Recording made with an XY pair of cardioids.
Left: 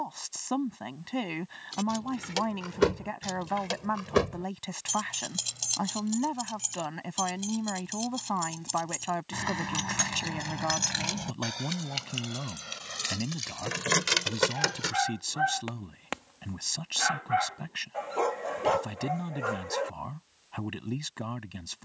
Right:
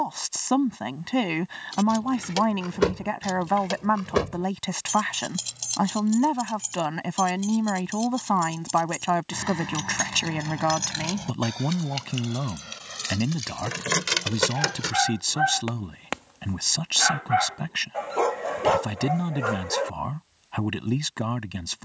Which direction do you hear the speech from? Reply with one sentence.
In this clip you hear the speech on the right.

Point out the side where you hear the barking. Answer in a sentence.
You can hear the barking on the right.